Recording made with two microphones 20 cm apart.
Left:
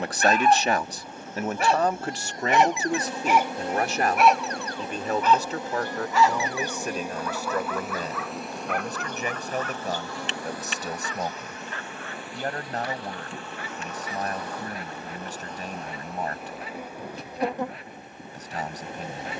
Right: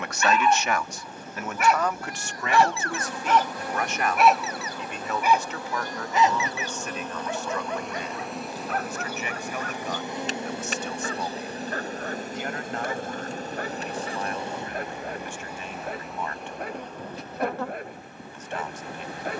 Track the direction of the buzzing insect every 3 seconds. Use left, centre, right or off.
left, left, centre, right, right, centre, left.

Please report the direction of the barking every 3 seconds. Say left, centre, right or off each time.
left, centre, right, right, right, right, right.